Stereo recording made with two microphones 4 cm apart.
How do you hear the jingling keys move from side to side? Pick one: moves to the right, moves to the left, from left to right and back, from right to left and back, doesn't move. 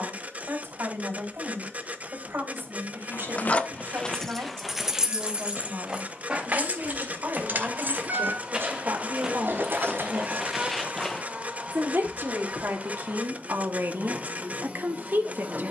moves to the right.